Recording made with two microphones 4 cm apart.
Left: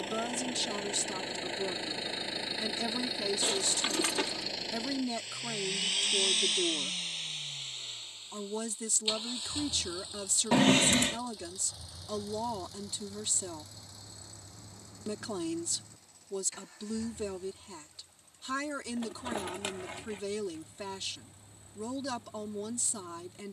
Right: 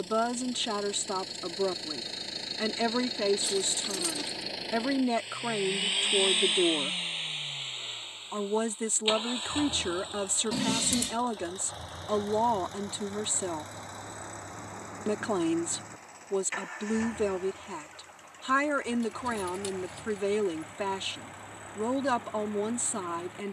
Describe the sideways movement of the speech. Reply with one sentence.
You can hear the speech stay in one place.